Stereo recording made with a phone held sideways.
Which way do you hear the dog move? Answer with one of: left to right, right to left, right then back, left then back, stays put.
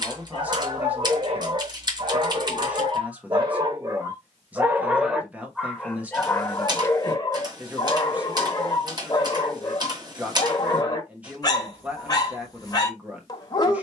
right to left.